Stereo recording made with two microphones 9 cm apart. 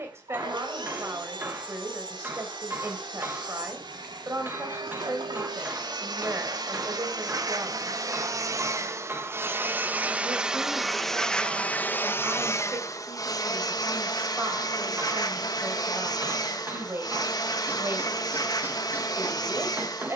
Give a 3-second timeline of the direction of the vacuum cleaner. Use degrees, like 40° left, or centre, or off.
70° right, 60° right, 50° right, 10° right, 40° left, 50° left, 50° left.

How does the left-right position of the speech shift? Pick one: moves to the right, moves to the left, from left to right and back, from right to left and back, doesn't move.
doesn't move.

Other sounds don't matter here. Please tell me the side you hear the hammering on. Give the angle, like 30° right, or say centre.
20° right.